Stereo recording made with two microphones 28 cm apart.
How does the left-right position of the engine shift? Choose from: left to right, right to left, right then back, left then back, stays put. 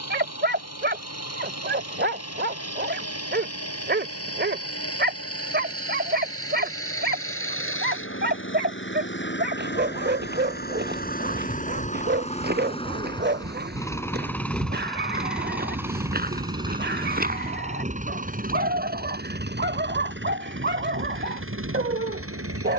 left to right.